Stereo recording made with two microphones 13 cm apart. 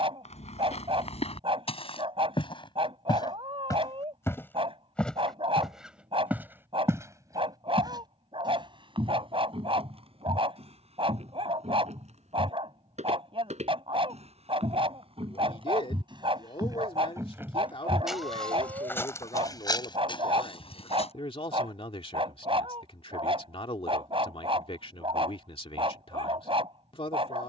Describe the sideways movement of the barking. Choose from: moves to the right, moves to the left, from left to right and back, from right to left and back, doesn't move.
doesn't move.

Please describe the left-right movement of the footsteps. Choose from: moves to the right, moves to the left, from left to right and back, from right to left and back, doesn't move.
from left to right and back.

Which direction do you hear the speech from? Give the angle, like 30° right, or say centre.
50° left.